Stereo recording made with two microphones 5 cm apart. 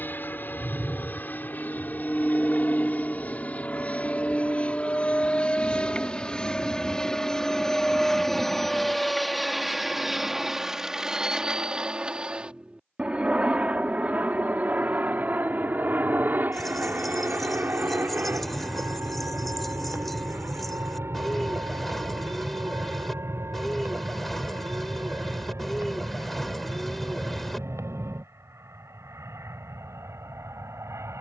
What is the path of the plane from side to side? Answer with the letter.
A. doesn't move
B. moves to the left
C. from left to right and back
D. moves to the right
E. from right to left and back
D.